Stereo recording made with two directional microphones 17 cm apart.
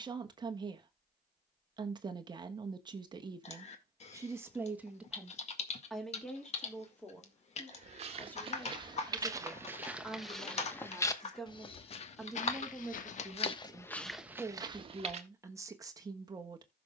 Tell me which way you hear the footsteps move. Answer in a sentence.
In this clip you hear the footsteps move from right to left and back again.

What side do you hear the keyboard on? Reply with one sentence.
In this clip you hear the keyboard on the left.